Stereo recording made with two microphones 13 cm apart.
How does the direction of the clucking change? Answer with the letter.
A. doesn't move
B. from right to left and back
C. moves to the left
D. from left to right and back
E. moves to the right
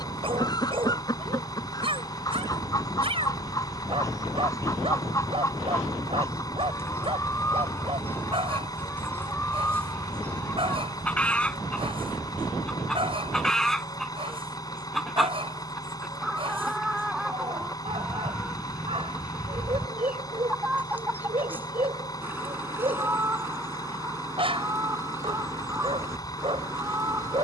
E.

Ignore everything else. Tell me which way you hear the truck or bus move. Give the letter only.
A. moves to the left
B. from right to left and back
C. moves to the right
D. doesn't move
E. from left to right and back
D.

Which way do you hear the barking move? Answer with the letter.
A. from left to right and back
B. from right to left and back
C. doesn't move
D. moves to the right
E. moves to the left
C.